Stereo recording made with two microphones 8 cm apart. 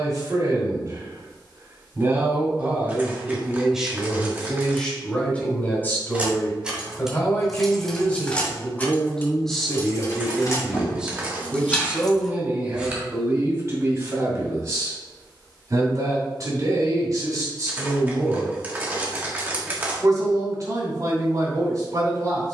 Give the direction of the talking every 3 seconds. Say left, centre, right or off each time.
right, centre, left, centre, right, right, right, right.